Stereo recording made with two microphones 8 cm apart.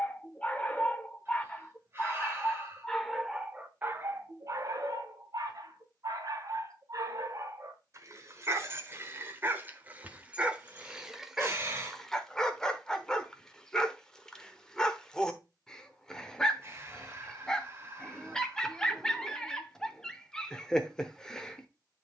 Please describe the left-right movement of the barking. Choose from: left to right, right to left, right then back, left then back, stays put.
right then back.